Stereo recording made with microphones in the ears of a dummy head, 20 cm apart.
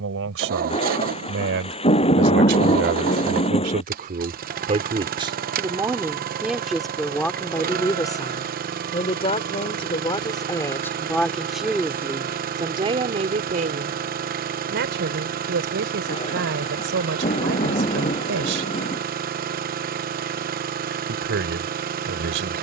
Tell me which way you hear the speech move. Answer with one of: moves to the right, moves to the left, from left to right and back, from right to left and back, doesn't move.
from right to left and back.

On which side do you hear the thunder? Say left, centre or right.
left.